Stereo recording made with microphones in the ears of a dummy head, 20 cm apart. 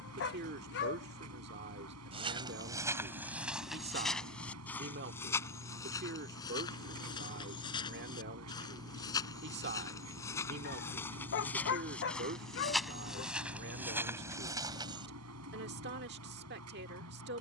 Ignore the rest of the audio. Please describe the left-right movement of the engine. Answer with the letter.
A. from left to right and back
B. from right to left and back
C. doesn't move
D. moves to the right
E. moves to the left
C.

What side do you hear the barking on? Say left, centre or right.
left.